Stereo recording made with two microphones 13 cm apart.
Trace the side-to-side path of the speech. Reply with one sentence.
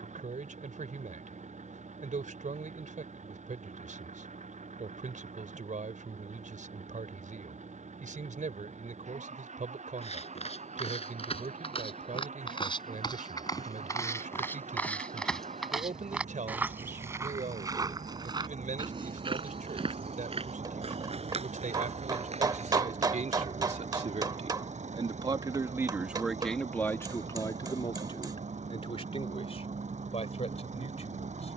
You can hear the speech move from right to left.